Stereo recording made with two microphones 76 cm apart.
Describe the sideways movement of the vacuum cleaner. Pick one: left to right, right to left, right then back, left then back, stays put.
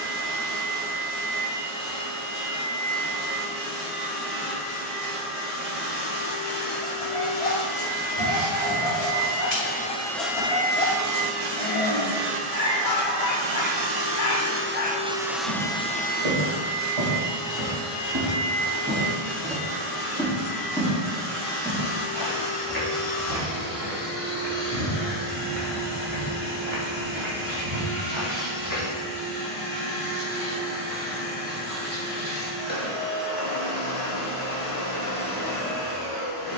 right then back.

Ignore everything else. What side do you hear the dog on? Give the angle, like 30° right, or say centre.
50° left.